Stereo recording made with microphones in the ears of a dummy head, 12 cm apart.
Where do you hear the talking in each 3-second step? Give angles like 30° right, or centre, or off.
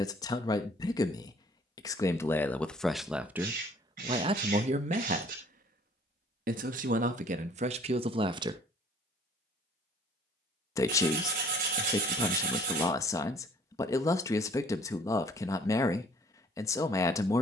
20° left, 30° right, 50° right, 20° left, 20° left, 20° left.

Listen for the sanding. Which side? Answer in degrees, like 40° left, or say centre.
60° right.